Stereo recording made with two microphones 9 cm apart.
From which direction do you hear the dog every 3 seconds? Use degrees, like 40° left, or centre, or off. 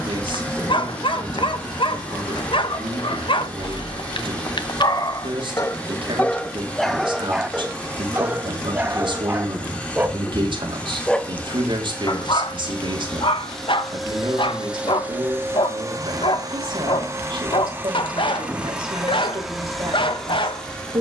80° left, 60° left, centre, 10° right, 70° left, 80° left, 80° left.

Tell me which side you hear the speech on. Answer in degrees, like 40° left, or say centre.
70° right.